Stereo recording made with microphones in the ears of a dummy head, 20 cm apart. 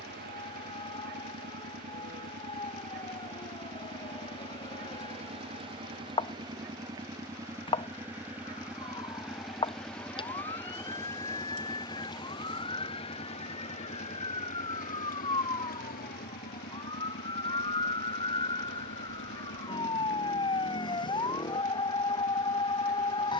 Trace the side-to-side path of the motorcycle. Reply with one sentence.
You can hear the motorcycle go from the right side to the left.